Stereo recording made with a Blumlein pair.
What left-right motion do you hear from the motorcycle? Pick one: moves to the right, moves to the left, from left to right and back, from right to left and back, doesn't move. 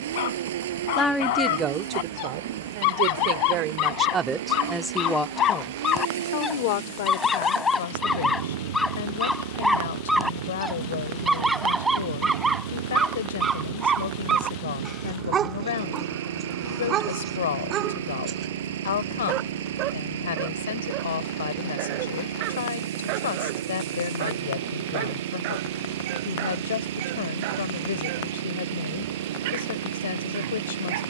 doesn't move.